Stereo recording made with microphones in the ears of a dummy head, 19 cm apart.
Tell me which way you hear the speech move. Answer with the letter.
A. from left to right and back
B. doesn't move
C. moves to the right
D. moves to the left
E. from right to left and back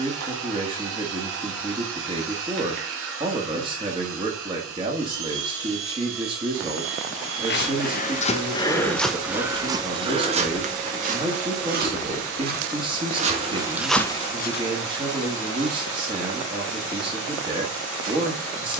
B.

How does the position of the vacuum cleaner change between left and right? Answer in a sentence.
In this clip you hear the vacuum cleaner stay put.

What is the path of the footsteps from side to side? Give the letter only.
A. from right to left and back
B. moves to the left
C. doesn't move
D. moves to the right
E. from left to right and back
E.